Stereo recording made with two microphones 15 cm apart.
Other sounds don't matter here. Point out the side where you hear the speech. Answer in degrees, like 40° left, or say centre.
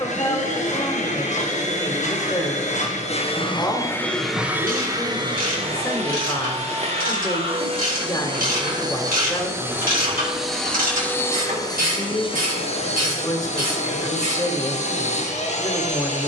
20° left.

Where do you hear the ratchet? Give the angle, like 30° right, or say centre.
70° right.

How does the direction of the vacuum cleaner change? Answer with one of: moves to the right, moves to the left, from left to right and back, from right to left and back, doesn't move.
from left to right and back.